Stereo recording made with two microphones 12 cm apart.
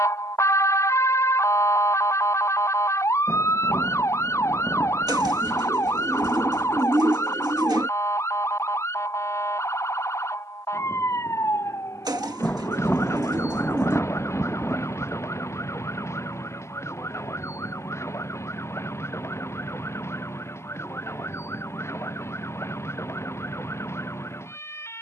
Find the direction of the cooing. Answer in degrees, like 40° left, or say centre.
30° right.